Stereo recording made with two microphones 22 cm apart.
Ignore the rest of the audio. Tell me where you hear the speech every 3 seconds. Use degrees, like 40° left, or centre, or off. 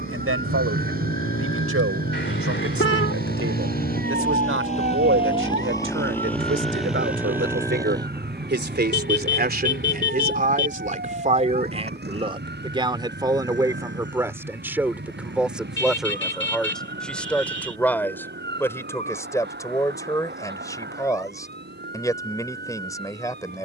80° right, 70° right, 60° right, 40° right, 20° right, centre, 10° left, 10° left.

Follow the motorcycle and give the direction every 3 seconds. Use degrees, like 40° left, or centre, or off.
60° left, 30° left, 10° right, 40° right, 50° right, 60° right, 60° right, 70° right.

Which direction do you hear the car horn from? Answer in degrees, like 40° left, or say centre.
60° left.